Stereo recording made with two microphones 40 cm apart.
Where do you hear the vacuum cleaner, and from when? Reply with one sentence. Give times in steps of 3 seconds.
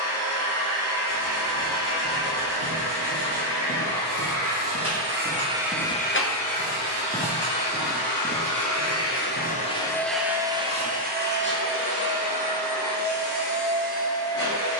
In this clip you hear the vacuum cleaner on the right from 0 s, on the left from 6 s, in the centre from 9 s and on the right from 12 s.